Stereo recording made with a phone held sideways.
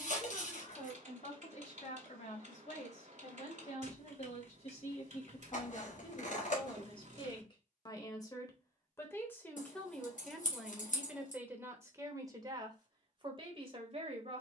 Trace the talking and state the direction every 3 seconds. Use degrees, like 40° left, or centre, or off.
60° left, 50° left, 30° left, centre, 40° right.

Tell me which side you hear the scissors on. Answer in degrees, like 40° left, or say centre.
60° left.